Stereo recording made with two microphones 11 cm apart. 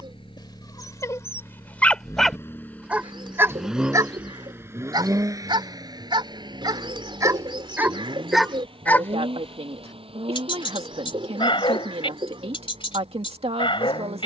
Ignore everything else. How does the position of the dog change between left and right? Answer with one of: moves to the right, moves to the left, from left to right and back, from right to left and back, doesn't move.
from left to right and back.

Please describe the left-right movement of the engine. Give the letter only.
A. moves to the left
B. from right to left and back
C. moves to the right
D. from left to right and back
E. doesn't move
C.